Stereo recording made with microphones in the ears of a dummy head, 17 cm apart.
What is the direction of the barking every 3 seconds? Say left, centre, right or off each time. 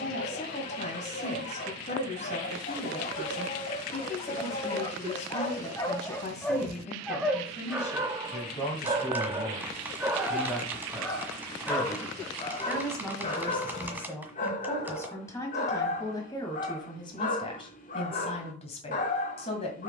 left, left, centre, centre, left, left, left.